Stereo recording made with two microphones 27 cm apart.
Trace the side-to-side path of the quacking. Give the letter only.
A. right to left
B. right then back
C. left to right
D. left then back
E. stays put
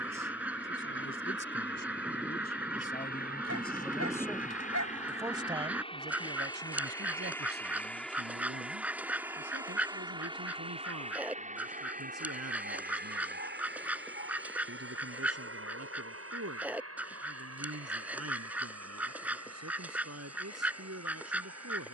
E.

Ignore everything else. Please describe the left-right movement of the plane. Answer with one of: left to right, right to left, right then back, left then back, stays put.
left to right.